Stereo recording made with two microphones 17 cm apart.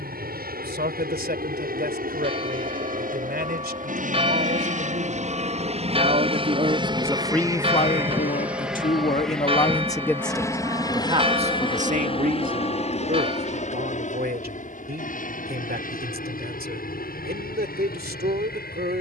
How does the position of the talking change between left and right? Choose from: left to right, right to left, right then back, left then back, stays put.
left then back.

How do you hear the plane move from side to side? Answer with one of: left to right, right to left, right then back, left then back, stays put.
right to left.